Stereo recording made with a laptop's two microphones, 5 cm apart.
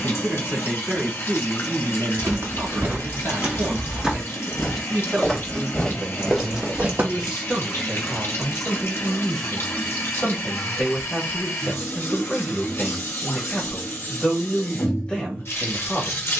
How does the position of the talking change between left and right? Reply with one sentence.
In this clip you hear the talking move to the left.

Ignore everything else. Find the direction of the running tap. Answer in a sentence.
In this clip you hear the running tap on the left.